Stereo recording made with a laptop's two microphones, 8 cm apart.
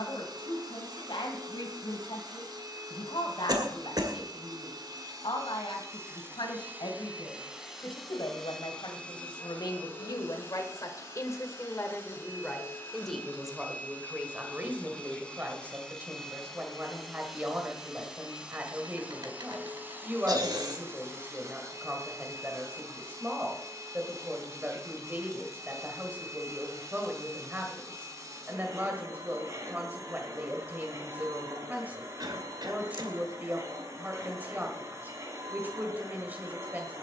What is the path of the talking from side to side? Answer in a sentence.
You can hear the talking travel towards the right.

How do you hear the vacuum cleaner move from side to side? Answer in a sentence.
You can hear the vacuum cleaner go left and come back.